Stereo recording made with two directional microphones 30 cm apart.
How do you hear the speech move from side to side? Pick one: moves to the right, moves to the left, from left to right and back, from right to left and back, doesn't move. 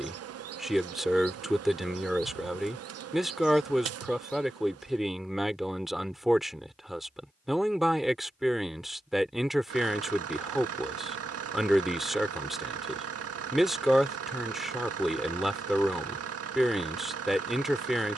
doesn't move.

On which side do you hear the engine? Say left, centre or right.
right.